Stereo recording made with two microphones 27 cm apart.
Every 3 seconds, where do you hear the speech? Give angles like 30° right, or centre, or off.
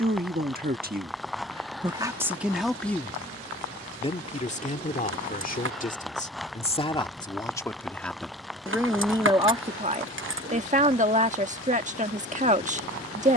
20° right, 30° left, 10° left, 20° right, 30° right.